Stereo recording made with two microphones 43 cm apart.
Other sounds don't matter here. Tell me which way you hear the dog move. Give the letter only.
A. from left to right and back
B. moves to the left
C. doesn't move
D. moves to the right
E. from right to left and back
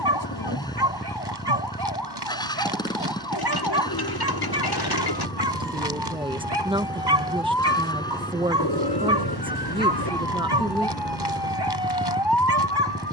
C.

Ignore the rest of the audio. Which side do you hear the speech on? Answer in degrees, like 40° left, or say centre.
10° right.